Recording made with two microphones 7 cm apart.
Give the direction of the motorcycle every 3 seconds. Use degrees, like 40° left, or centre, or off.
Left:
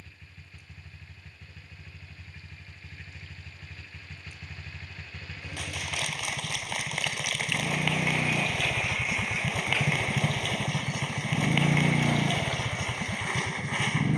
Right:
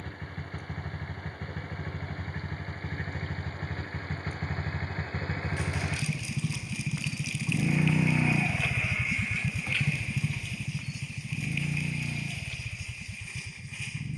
60° right, 50° right, 20° right, 30° left, 60° left.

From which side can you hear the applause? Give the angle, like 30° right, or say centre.
70° left.